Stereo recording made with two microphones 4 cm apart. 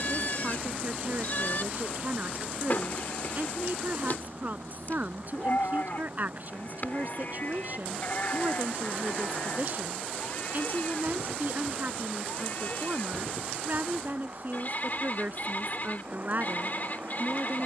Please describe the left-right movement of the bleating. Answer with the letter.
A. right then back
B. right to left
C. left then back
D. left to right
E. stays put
E.